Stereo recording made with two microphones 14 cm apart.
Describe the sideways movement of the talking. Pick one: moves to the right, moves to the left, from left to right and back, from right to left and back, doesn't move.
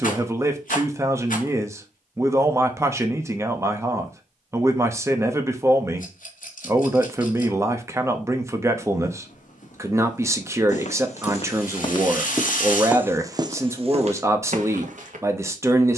doesn't move.